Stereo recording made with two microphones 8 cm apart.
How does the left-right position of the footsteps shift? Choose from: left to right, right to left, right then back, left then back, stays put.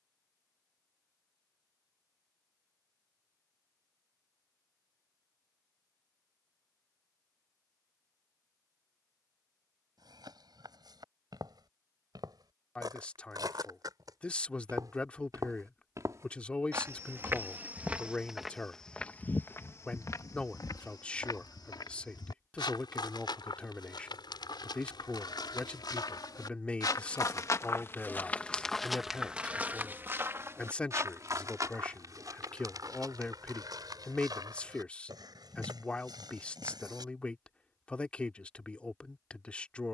left then back.